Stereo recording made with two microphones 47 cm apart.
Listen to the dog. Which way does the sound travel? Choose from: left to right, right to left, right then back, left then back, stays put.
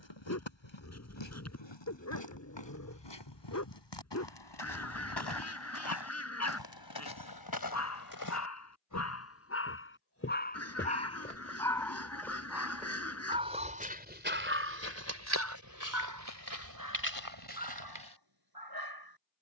left to right.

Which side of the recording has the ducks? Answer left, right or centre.
left.